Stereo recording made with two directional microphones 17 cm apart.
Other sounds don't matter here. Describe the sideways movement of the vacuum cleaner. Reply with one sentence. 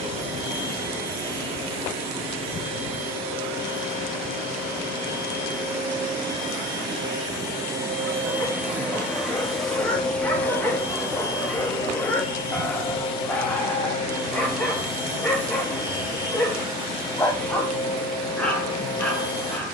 In this clip you hear the vacuum cleaner travel towards the left.